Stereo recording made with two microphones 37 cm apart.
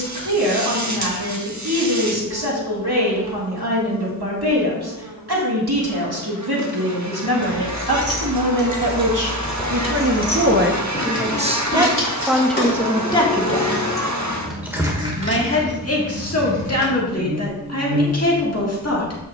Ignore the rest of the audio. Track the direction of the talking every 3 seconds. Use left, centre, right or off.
right, right, right, right, centre, left, left.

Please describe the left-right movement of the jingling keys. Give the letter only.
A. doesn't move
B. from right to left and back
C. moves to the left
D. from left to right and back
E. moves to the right
B.